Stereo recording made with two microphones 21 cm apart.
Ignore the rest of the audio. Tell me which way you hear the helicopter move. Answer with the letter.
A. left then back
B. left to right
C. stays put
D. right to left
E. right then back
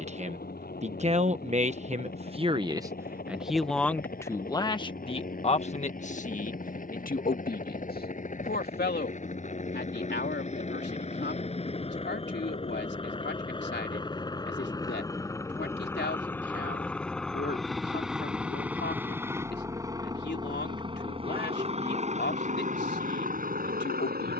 B.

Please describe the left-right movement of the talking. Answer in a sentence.
You can hear the talking move to the left.